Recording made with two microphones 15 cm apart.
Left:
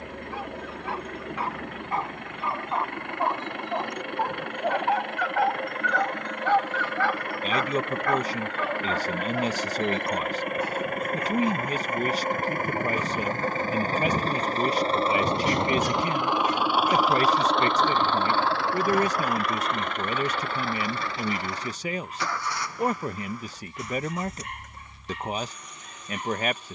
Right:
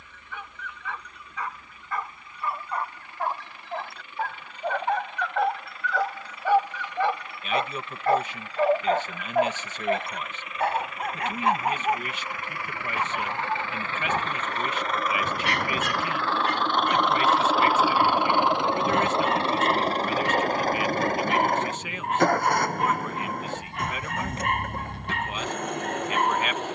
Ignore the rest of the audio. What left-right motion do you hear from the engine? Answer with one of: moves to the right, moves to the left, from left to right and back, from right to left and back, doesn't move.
moves to the right.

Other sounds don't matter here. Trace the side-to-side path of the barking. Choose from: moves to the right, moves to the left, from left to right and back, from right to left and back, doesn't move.
moves to the right.